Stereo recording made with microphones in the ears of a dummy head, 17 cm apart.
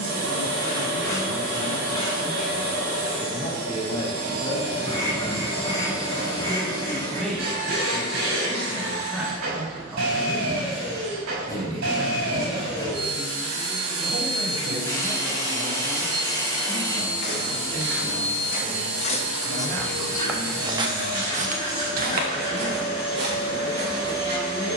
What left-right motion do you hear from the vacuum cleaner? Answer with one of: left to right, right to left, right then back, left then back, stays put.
stays put.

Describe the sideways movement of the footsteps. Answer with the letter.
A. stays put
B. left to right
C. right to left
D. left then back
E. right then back
B.